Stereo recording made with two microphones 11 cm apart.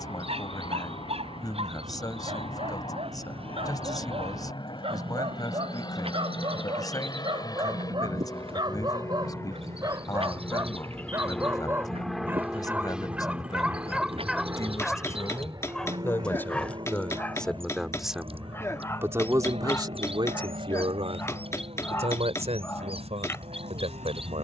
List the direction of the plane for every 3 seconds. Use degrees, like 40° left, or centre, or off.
60° left, 50° left, 40° left, 20° left, 10° right, 40° right, 60° right, 70° right.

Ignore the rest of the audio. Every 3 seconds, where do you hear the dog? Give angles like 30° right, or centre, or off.
70° right, 60° right, 50° right, 30° right, 10° right, 10° left, 20° left, 20° left.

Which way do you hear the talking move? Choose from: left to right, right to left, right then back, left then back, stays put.
left to right.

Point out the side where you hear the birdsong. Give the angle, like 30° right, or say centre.
60° right.